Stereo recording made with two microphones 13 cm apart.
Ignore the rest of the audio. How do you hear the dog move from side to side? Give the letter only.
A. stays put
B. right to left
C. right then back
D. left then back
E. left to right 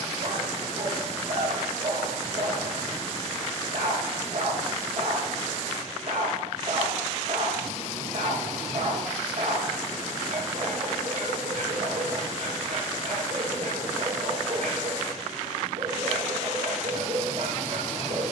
A.